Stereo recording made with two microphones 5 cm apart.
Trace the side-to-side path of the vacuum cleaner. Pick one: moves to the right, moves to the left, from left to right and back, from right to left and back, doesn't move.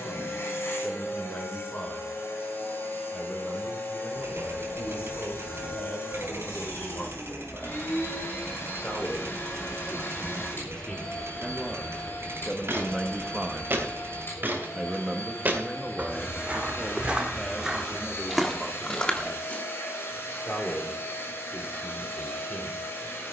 doesn't move.